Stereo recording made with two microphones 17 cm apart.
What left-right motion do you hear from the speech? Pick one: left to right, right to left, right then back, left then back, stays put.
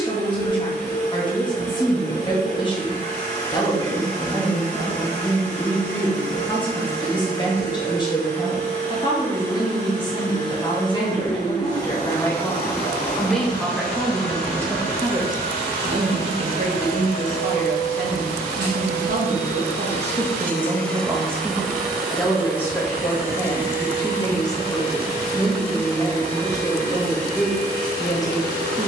right then back.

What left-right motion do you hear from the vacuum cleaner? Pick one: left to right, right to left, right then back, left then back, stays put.
left to right.